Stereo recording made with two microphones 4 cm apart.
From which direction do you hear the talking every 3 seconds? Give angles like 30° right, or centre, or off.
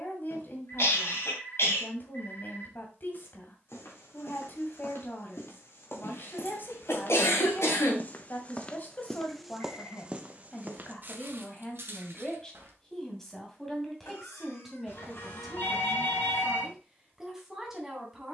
50° left, 50° left, 50° left, 30° left, 10° left, 10° right.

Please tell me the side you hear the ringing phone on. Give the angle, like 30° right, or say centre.
60° left.